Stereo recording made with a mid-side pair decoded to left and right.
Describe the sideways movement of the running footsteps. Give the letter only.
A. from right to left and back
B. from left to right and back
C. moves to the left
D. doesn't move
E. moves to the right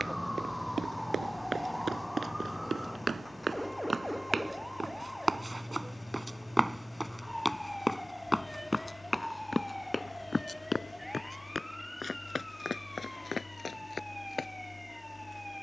C.